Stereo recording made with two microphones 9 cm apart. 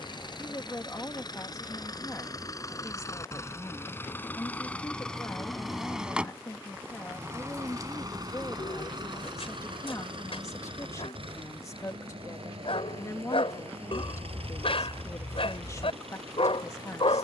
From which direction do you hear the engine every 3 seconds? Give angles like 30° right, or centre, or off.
40° left, 20° left, 30° right, 60° right, 80° right, 80° right.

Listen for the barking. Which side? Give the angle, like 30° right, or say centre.
70° left.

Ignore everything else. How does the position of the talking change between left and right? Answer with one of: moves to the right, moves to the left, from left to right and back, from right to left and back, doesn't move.
doesn't move.